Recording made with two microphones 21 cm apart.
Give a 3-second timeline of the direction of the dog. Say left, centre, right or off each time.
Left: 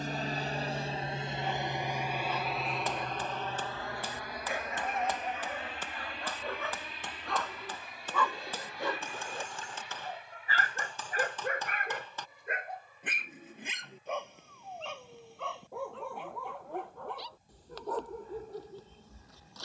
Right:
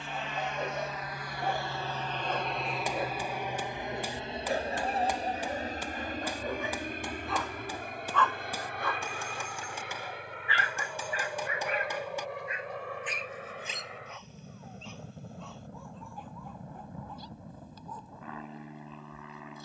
right, right, centre, left, left, left, left.